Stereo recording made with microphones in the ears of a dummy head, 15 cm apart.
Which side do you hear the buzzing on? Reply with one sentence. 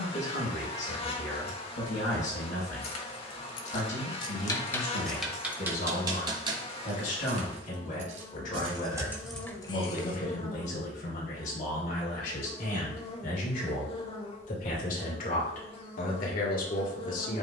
You can hear the buzzing on the left.